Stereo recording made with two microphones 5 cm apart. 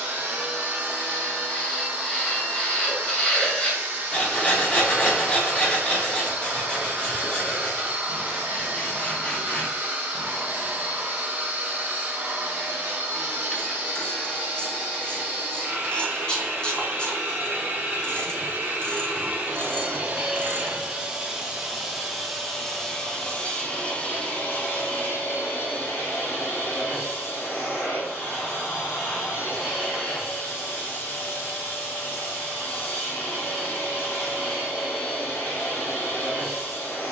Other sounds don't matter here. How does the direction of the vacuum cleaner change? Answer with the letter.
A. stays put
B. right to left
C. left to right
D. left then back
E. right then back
B.